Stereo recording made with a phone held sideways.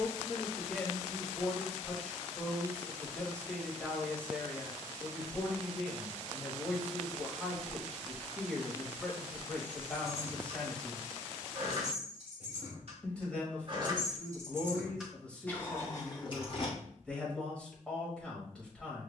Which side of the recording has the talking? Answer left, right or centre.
centre.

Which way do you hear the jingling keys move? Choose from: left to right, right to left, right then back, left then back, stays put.
right to left.